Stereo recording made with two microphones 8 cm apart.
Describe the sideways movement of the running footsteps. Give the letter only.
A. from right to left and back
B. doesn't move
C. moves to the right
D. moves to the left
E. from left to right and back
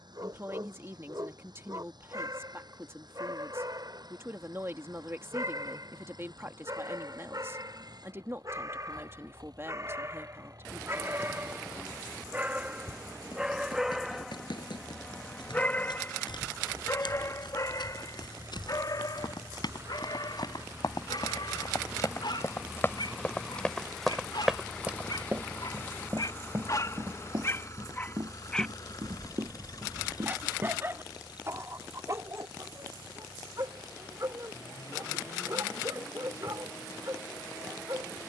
C.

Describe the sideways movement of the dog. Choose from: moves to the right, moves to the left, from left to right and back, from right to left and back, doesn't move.
from right to left and back.